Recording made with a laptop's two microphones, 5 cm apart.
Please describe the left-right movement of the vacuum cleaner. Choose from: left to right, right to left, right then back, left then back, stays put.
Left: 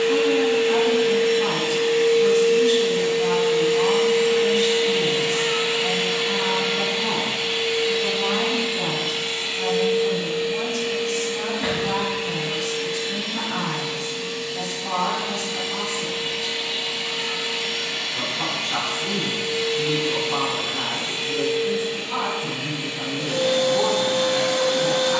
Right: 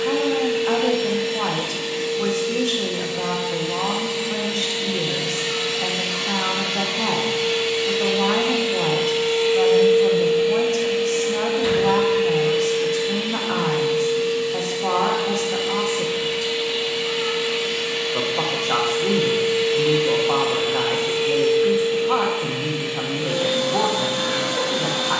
left to right.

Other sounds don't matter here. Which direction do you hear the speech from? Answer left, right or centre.
right.